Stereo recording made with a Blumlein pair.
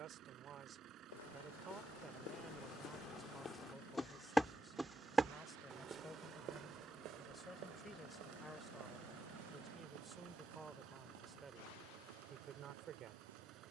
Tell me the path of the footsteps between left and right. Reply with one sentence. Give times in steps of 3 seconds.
You can hear the footsteps on the left from 0 s, in the centre from 3 s and on the right from 6 s.